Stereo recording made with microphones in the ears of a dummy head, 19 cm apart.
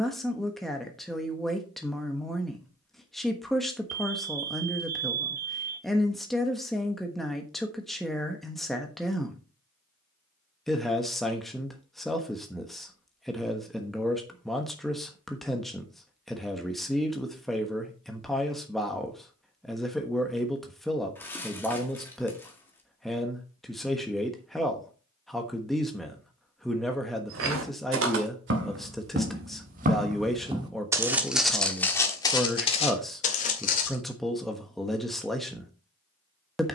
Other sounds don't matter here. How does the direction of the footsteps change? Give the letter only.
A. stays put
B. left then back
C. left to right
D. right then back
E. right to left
E.